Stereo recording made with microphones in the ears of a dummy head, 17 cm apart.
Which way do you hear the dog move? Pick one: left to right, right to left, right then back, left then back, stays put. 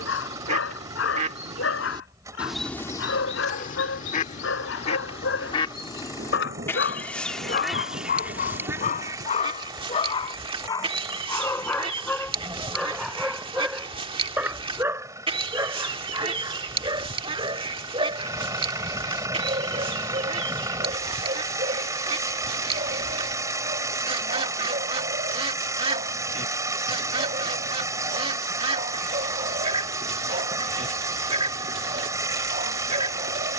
left to right.